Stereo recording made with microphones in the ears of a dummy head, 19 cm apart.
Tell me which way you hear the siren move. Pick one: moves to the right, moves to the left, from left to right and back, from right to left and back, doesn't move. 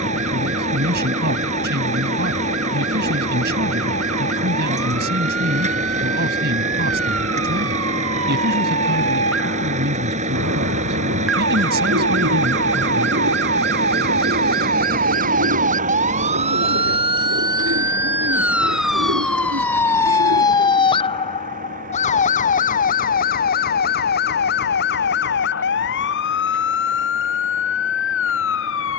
moves to the left.